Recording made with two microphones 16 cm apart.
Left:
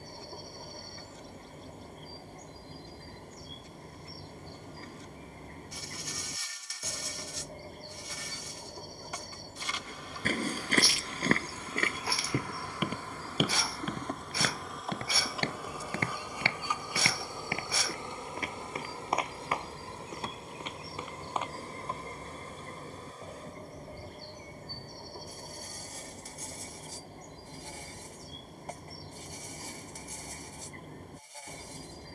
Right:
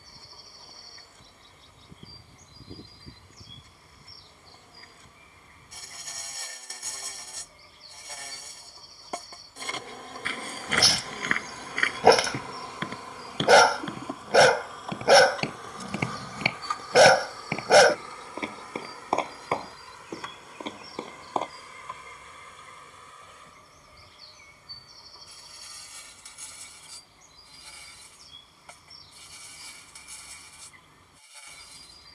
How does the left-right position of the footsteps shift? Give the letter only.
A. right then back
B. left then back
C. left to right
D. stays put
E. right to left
C.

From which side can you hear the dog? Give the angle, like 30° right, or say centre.
80° right.